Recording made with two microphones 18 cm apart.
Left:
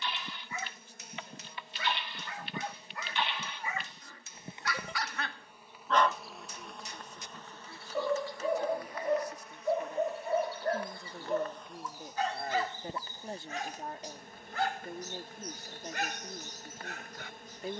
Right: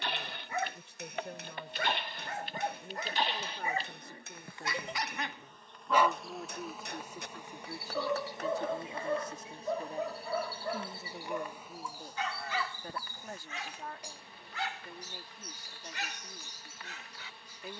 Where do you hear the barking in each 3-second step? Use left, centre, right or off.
right, right, centre, left, left, left.